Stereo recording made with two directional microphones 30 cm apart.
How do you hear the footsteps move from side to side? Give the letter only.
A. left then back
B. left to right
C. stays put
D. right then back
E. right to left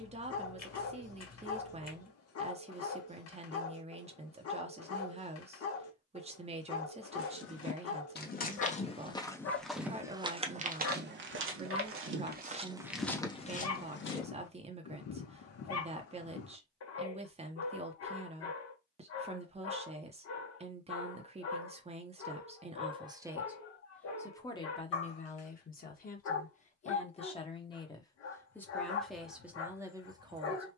D.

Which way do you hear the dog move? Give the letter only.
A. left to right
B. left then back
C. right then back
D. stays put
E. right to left
D.